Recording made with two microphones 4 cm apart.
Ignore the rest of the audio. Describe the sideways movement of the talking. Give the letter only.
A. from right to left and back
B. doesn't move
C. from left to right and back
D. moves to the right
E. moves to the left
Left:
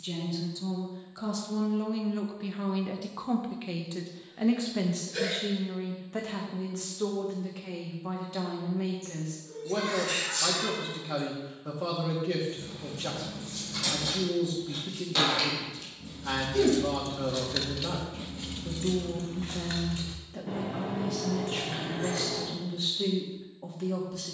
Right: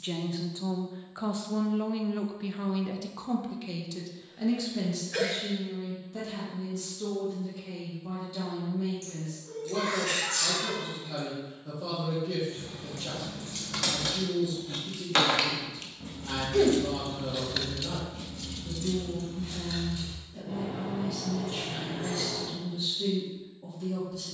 E.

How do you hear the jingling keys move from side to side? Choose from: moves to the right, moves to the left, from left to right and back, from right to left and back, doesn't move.
moves to the left.